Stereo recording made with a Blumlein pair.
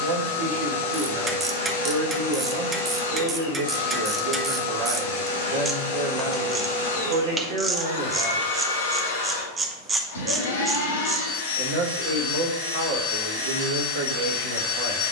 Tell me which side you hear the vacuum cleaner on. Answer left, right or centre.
left.